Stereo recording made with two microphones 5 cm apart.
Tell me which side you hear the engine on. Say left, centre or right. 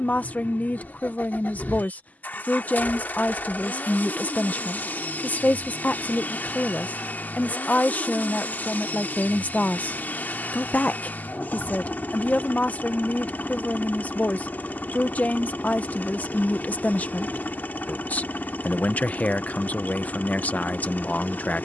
left.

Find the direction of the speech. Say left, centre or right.
left.